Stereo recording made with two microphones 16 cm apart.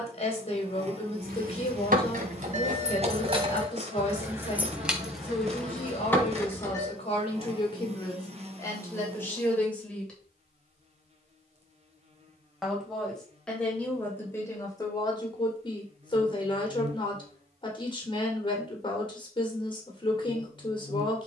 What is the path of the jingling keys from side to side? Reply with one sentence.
You can hear the jingling keys move from right to left.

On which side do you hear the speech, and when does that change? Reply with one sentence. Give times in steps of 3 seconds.
In this clip you hear the speech on the left from 0 s, in the centre from 9 s and on the left from 15 s.